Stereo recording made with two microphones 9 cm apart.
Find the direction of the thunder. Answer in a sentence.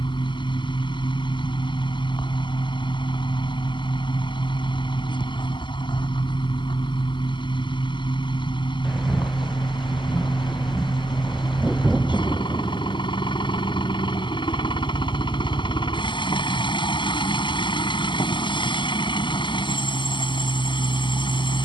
In this clip you hear the thunder in the centre.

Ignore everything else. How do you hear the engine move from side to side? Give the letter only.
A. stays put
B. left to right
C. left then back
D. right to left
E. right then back
A.